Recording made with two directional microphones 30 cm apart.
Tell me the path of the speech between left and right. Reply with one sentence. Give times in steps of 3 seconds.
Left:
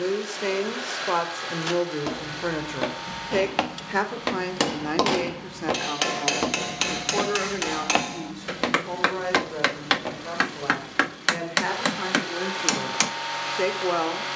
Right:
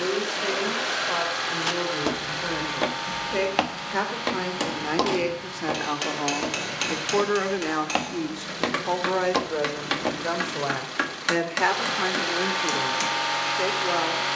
In this clip you hear the speech on the left from 0 s, in the centre from 3 s, on the right from 6 s and in the centre from 12 s.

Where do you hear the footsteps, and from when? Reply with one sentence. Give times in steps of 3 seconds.
You can hear the footsteps on the right from 0 s, in the centre from 3 s, on the left from 6 s, in the centre from 9 s and not at all from 12 s.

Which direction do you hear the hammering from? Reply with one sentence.
In this clip you hear the hammering on the left.